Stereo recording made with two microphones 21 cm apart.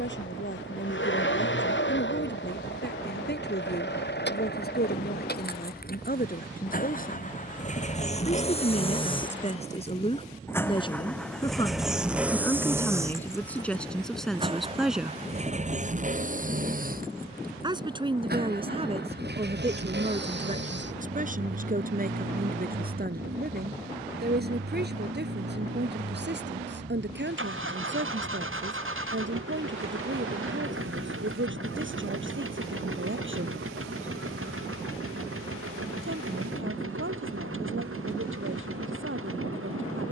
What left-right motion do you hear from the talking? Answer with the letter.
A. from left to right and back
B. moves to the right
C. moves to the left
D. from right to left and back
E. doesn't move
B.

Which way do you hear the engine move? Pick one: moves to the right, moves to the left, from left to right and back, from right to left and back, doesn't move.
moves to the right.